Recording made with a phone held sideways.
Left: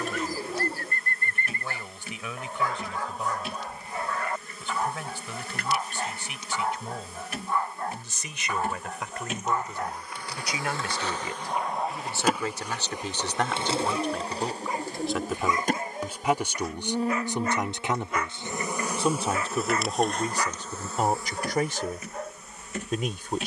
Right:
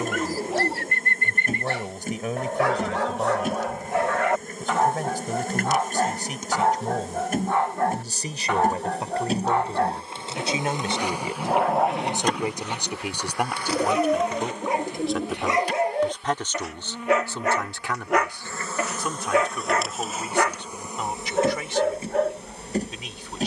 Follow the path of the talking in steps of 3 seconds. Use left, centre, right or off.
right, right, right, right, centre, centre, left, left.